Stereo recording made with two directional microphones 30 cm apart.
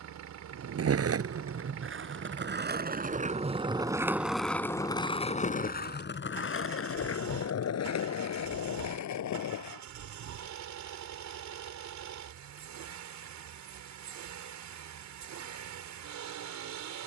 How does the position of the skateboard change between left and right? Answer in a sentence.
In this clip you hear the skateboard move from right to left.